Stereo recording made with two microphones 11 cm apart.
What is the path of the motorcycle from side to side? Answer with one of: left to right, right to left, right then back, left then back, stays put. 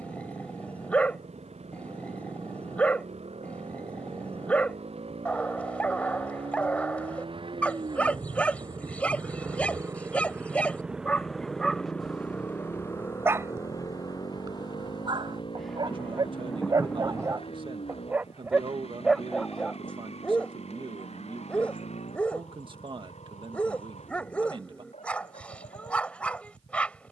right to left.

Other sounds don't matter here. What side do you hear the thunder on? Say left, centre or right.
centre.